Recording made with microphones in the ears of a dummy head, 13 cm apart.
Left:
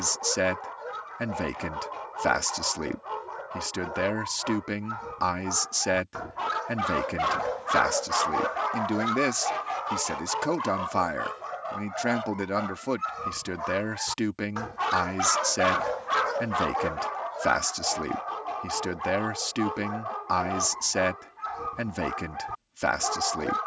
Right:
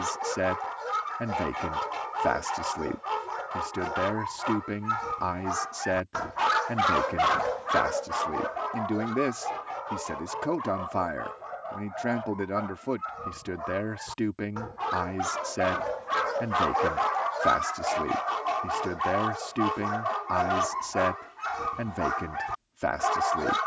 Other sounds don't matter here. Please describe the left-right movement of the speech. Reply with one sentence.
In this clip you hear the speech stay in one place.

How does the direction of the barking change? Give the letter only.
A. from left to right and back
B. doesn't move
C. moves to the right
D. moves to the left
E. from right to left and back
E.